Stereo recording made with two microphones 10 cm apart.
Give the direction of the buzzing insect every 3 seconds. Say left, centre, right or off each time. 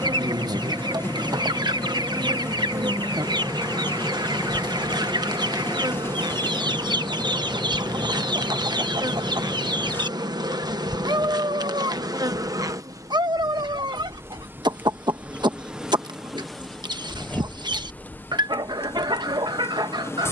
right, right, right, right, right, centre, left.